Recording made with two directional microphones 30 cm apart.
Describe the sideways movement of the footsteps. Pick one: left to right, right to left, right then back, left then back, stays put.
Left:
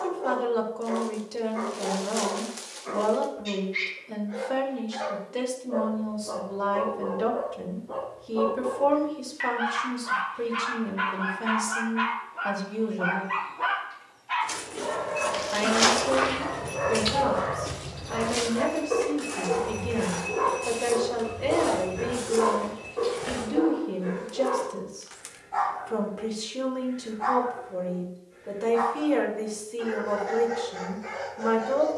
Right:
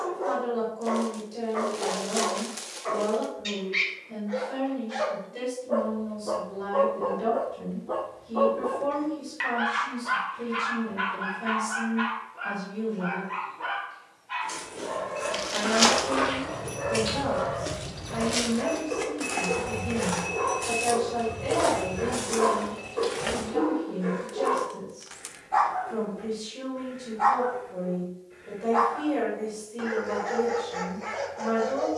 left to right.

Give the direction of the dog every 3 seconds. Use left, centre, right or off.
right, right, right, centre, left, left, left, centre, right, right, right.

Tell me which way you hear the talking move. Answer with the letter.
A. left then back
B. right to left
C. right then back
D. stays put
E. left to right
D.